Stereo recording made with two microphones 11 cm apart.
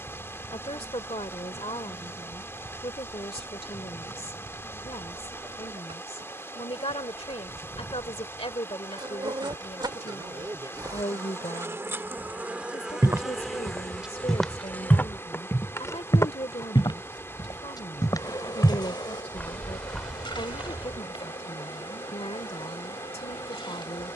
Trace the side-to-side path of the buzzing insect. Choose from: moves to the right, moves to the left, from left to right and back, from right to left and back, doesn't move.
moves to the left.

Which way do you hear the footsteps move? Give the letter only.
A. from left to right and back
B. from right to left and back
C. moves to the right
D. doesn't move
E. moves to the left
B.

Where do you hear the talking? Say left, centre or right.
left.